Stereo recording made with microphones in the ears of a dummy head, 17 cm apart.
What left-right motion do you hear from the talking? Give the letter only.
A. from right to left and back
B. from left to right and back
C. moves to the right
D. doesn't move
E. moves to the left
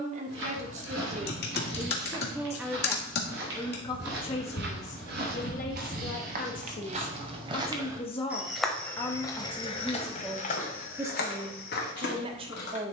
A.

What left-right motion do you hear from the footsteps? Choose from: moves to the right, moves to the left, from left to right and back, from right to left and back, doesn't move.
moves to the left.